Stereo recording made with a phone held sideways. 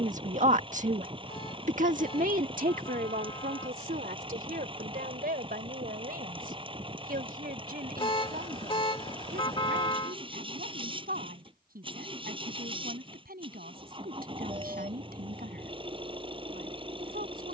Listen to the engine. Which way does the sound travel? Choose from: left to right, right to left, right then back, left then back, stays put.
stays put.